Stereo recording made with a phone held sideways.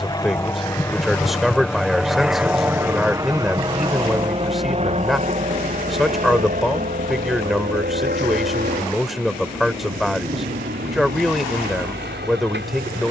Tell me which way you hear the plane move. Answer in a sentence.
You can hear the plane move from left to right.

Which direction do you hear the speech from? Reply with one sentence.
In this clip you hear the speech in the centre.